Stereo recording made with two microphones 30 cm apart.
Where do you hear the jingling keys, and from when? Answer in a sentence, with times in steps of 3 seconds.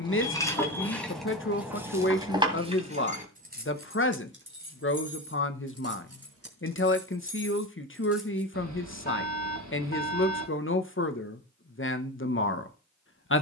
In this clip you hear the jingling keys in the centre from 0 s, on the right from 3 s and not at all from 9 s.